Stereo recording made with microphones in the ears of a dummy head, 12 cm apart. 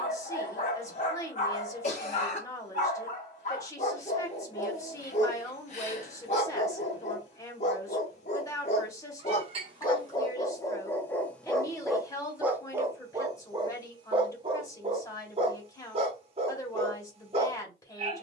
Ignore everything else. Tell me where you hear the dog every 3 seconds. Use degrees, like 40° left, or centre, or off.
60° left, 60° left, 50° left, 20° left, 30° right, 40° right.